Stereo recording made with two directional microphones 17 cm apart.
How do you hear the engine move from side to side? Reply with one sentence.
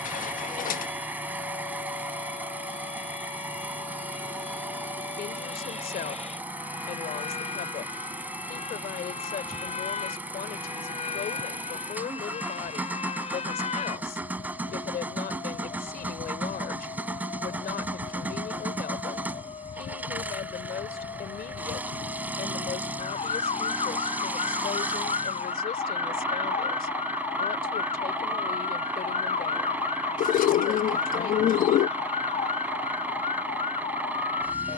You can hear the engine stay in one place.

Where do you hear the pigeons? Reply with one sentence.
You can hear the pigeons on the left.